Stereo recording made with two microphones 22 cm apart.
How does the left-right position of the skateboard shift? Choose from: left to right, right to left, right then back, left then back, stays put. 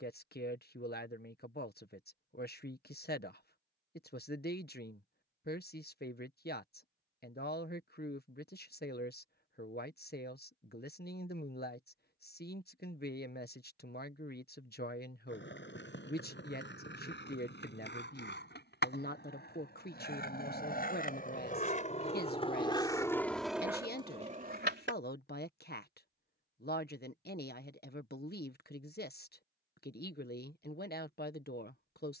left to right.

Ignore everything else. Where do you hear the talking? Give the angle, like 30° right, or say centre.
50° left.